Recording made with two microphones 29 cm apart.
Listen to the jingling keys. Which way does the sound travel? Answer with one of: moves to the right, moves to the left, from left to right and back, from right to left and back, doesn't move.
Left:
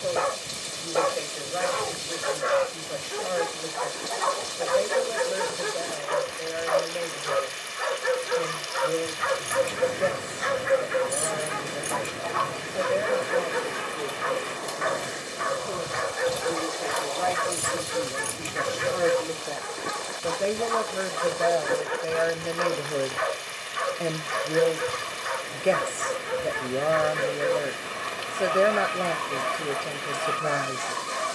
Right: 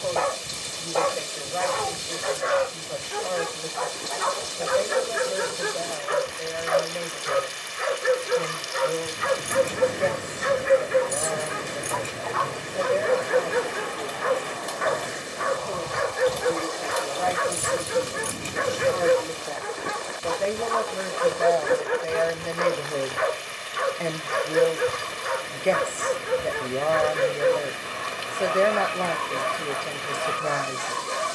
from right to left and back.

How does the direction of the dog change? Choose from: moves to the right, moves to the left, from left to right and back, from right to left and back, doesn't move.
moves to the right.